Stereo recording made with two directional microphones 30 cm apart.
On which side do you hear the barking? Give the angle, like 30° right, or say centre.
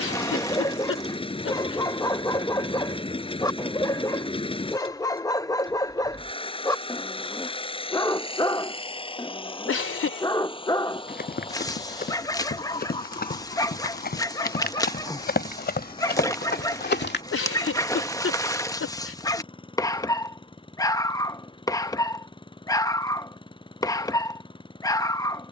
10° left.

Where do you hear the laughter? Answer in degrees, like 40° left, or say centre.
50° left.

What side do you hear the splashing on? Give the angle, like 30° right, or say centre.
10° left.